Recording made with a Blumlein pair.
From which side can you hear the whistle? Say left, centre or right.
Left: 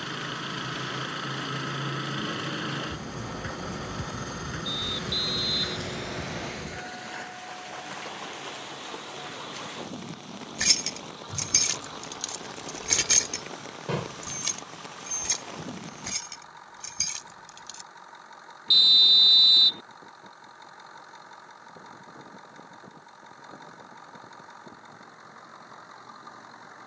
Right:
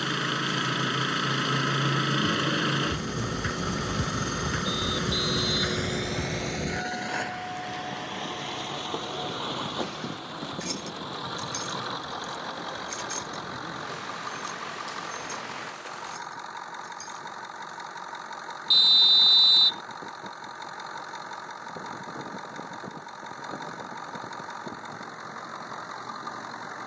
centre.